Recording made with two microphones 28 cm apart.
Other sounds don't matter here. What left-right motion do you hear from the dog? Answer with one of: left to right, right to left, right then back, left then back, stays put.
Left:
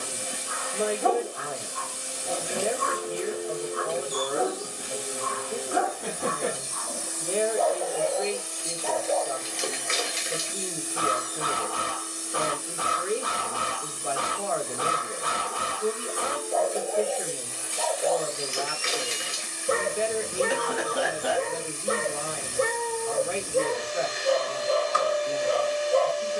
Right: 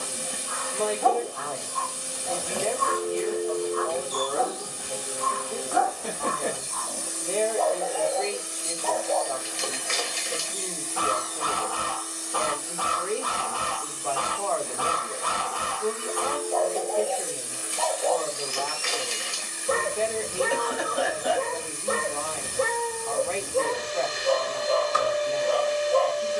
stays put.